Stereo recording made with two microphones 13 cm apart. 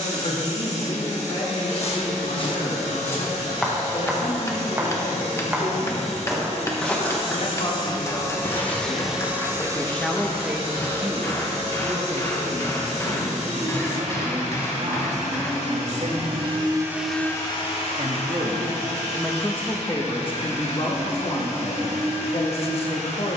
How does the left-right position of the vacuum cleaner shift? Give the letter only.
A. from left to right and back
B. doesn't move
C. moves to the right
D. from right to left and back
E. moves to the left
A.